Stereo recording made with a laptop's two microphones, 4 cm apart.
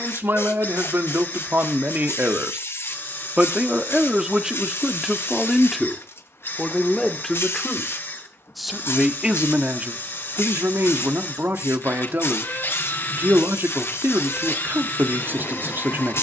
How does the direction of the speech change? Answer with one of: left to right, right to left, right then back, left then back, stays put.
left then back.